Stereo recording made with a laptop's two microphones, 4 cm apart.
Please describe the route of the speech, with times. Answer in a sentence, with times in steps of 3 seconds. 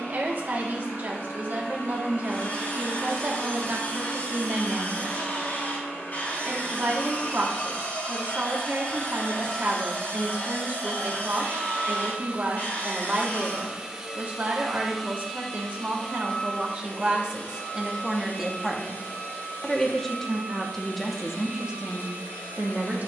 In this clip you hear the speech on the right from 0 s, in the centre from 18 s and on the right from 21 s.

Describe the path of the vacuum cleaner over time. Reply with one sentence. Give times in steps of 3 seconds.
In this clip you hear the vacuum cleaner on the left from 0 s, on the right from 9 s and on the left from 15 s.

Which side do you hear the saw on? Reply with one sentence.
In this clip you hear the saw on the left.